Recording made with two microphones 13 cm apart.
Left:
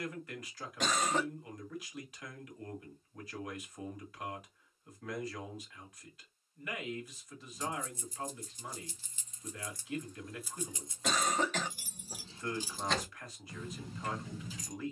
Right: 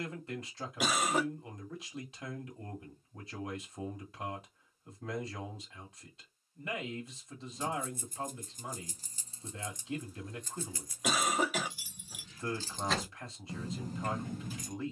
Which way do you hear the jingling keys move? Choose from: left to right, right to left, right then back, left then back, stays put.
left then back.